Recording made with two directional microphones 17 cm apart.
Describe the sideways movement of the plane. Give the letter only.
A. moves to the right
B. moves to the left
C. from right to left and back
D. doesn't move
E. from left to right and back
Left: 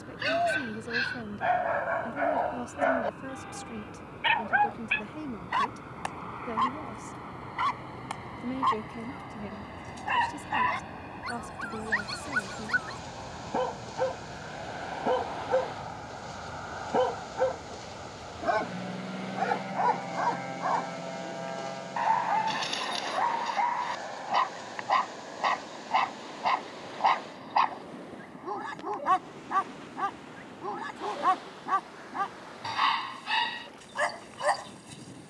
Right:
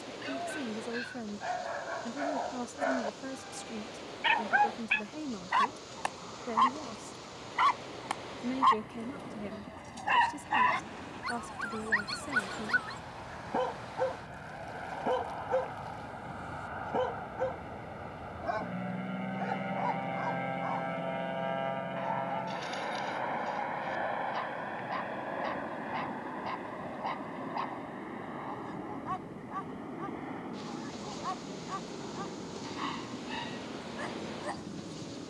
A.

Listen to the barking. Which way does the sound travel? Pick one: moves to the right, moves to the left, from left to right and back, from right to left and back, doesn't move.
from left to right and back.